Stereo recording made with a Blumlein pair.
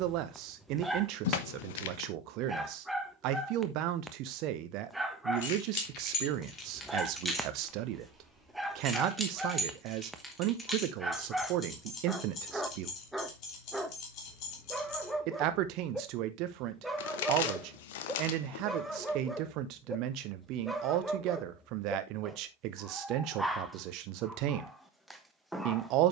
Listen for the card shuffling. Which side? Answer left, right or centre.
left.